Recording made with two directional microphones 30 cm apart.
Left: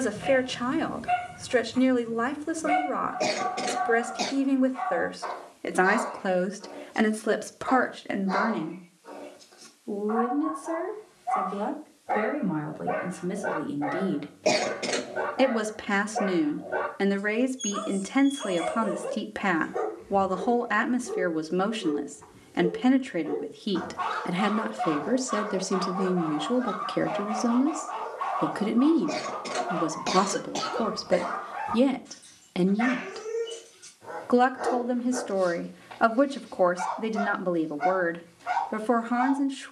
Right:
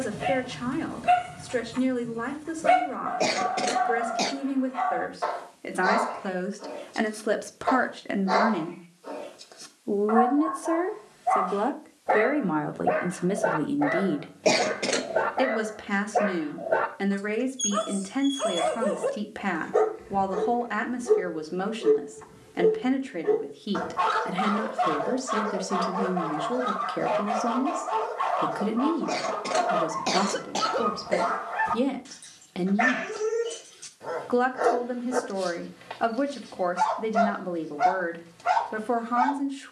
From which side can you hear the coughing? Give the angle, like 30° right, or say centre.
20° right.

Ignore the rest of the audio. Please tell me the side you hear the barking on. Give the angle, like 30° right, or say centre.
70° right.